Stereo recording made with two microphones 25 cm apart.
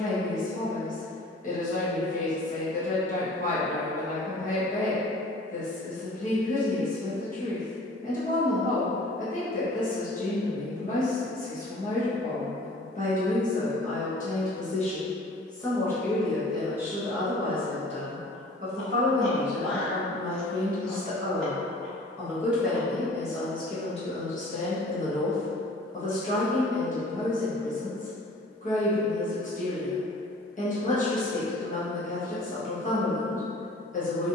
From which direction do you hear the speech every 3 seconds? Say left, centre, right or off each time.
left, left, left, left, left, centre, right, centre, left, left, left, left.